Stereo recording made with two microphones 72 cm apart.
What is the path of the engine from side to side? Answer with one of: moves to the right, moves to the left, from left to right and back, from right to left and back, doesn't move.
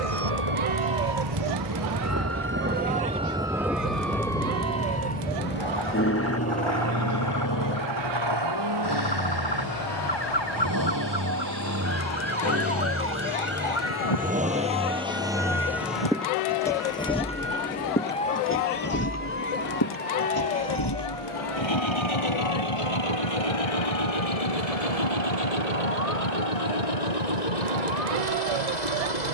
moves to the left.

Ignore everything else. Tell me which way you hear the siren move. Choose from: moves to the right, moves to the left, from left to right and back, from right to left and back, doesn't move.
moves to the left.